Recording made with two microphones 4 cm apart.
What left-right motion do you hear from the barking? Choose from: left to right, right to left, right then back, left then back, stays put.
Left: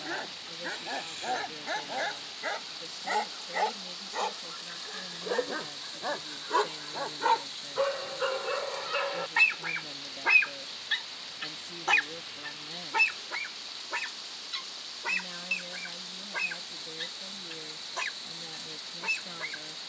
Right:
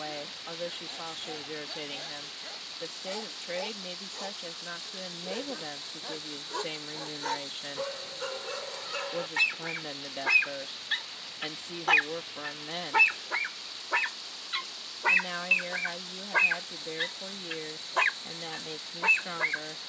left to right.